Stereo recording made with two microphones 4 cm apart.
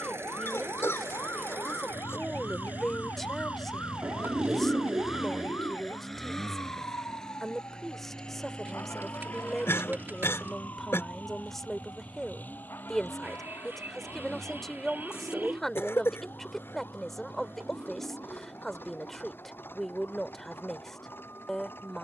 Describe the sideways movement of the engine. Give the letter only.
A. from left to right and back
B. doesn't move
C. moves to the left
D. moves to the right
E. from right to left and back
C.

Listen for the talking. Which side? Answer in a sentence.
In this clip you hear the talking in the centre.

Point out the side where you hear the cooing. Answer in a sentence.
You can hear the cooing on the right.